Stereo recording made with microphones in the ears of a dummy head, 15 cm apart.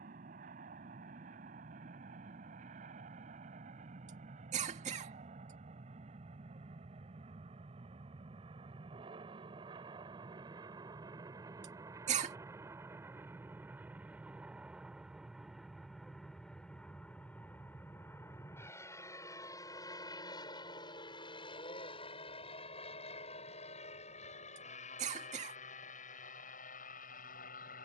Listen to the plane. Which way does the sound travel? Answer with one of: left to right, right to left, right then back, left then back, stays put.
right to left.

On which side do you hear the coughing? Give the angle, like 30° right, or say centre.
40° right.